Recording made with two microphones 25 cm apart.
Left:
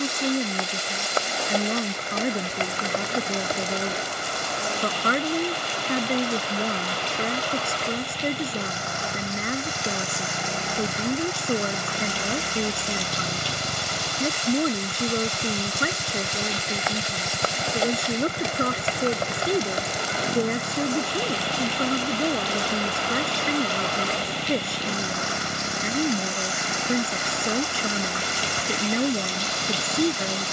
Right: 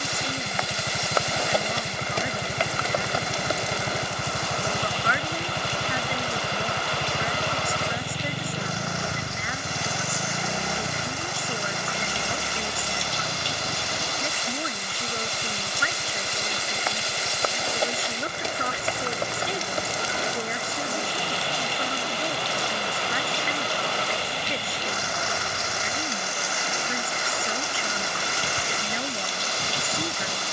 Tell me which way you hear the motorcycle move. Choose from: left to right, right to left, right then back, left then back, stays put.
right to left.